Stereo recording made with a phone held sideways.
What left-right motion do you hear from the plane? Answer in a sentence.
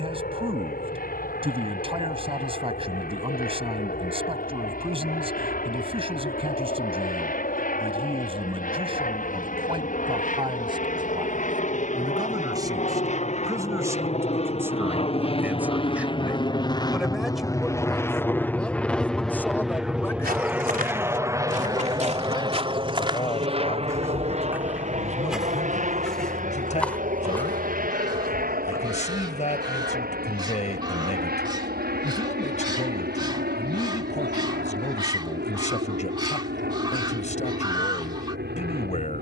In this clip you hear the plane move to the right.